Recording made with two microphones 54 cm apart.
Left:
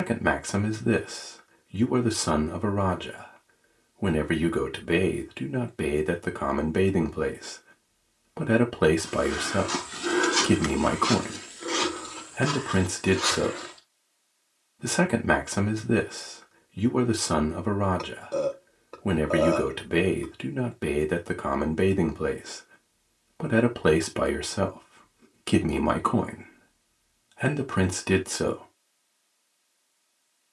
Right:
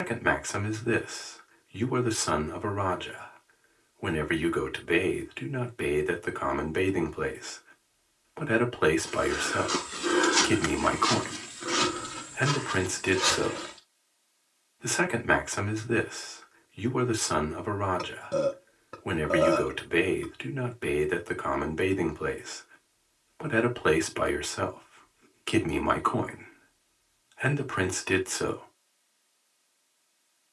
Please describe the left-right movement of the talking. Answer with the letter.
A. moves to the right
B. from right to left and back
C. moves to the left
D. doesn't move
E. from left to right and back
D.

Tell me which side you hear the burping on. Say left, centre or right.
right.